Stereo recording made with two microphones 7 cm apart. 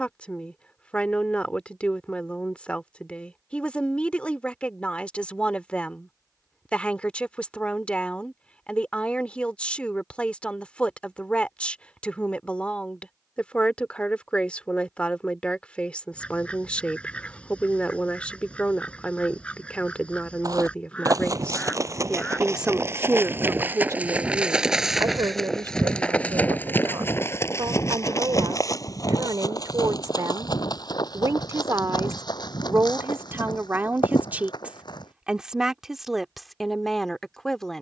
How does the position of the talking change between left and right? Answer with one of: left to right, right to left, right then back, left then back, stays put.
right then back.